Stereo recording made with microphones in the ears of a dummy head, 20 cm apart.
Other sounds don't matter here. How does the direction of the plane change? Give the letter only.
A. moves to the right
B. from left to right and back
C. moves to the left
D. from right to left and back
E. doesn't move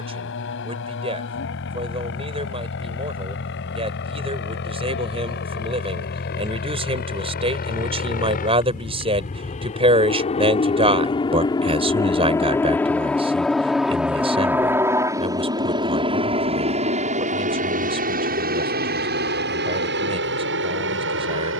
A.